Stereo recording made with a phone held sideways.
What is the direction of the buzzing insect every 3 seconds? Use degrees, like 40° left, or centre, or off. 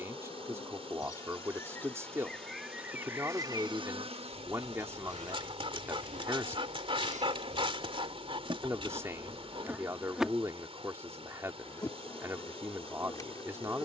20° left, 50° right, 60° right, centre, 30° left.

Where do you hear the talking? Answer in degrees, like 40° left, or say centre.
20° right.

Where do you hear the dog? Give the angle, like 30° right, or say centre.
40° right.